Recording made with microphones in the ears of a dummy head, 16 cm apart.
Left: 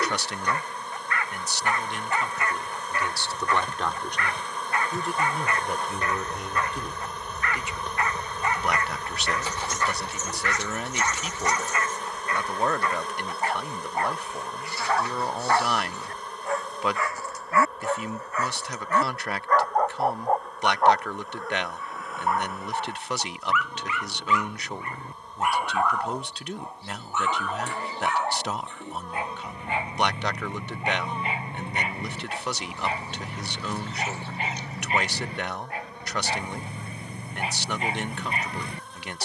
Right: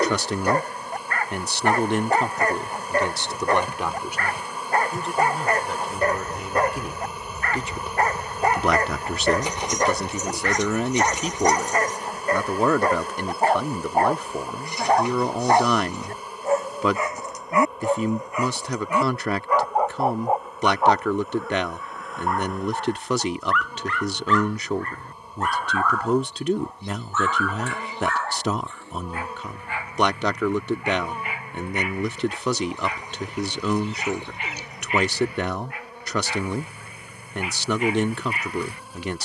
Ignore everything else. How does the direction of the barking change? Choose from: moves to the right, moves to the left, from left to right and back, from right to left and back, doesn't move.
moves to the left.